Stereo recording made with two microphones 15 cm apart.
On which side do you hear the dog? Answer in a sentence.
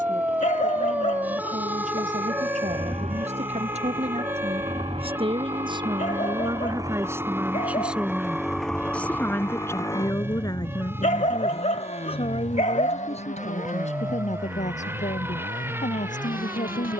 In this clip you hear the dog on the left.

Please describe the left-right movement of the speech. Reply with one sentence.
In this clip you hear the speech move from right to left.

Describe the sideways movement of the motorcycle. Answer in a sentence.
In this clip you hear the motorcycle move to the left.